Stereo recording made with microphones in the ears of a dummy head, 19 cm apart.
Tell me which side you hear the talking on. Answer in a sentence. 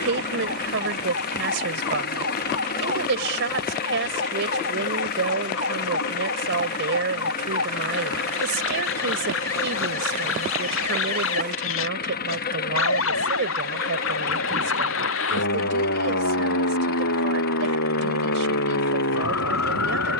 You can hear the talking on the right.